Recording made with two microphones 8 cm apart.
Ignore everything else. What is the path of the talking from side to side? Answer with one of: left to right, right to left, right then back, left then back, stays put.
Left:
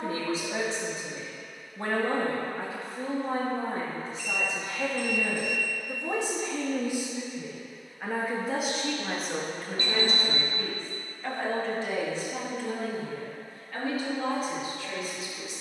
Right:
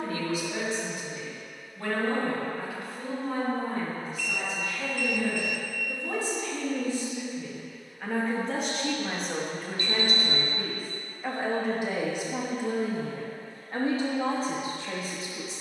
left to right.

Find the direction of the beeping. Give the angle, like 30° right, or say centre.
40° left.